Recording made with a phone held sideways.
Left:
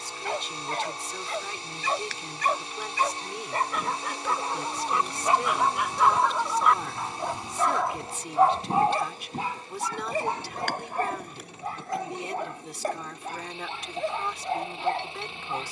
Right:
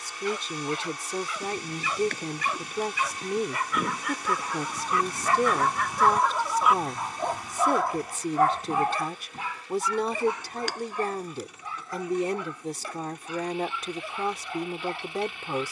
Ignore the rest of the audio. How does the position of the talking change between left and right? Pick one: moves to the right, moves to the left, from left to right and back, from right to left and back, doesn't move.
doesn't move.